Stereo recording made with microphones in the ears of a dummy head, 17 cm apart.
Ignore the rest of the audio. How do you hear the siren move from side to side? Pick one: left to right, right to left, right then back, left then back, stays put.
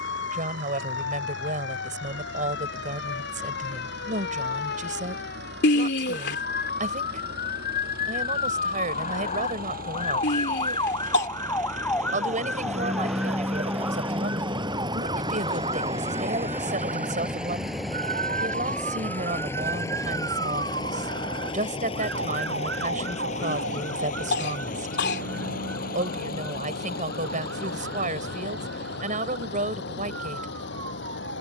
left to right.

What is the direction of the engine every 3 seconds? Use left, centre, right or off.
right, right, right, right, right, centre, centre, left, left, left, left.